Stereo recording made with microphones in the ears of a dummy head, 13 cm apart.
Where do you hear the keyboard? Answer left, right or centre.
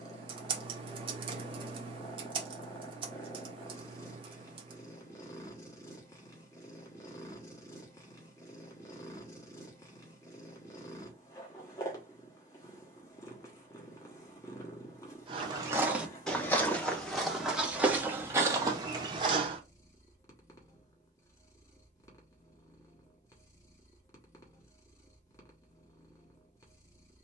right.